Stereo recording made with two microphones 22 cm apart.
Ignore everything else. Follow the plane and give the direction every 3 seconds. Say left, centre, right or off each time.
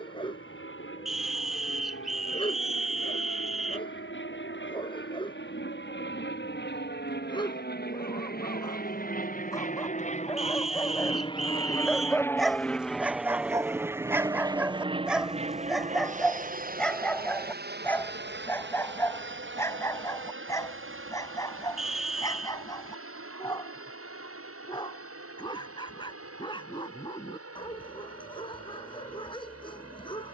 left, left, left, left, centre, right, right, right, right, right.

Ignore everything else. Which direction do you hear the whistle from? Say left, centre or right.
centre.